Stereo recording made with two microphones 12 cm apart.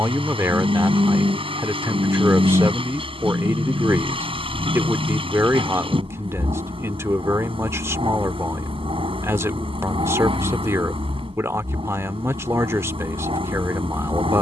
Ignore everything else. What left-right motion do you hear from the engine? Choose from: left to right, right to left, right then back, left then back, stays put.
stays put.